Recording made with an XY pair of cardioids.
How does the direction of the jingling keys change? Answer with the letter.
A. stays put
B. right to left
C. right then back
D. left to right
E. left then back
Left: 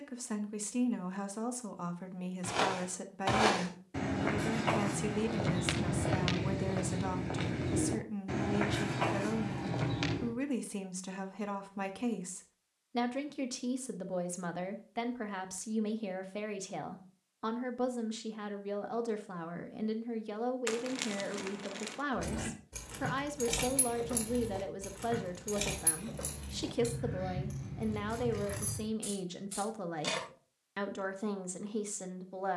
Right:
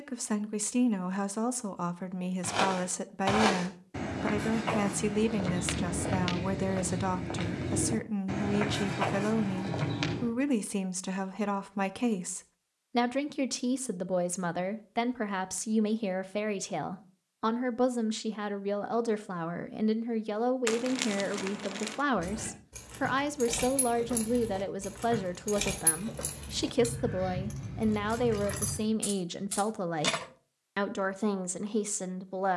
D.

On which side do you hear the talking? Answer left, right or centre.
right.